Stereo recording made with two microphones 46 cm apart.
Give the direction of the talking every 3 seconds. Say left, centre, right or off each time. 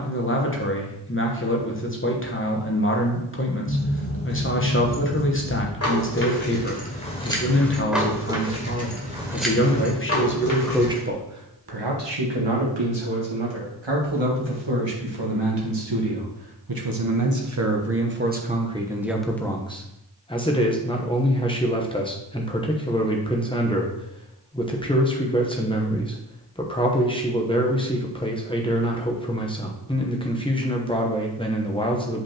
left, left, left, centre, right, right, centre, centre, centre, centre, centre.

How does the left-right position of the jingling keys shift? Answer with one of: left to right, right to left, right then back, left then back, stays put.
right then back.